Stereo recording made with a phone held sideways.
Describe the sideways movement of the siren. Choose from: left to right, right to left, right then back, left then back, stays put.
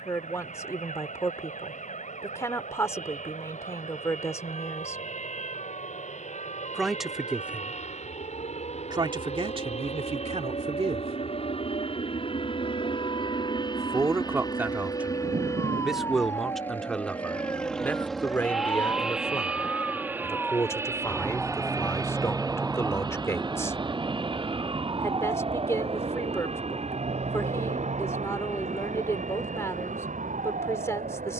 left to right.